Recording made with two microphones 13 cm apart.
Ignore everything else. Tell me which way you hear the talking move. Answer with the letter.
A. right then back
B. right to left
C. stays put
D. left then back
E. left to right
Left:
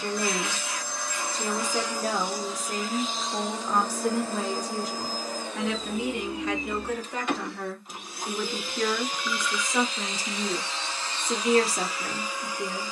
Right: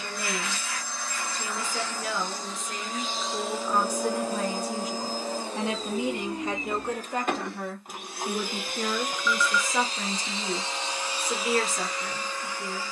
A.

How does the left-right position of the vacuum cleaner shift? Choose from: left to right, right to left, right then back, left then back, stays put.
right then back.